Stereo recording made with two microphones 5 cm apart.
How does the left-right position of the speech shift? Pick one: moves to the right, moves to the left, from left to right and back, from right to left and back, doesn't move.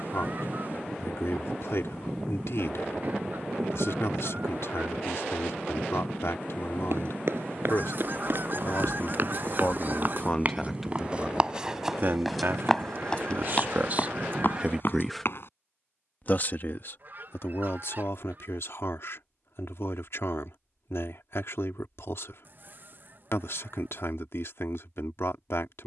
from left to right and back.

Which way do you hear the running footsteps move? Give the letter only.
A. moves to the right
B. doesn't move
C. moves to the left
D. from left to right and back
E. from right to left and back
C.